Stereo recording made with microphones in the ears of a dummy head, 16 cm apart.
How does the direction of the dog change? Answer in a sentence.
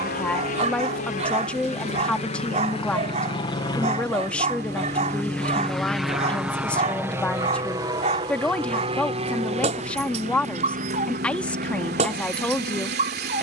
You can hear the dog stay put.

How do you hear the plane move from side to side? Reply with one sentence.
You can hear the plane go from the left side to the right.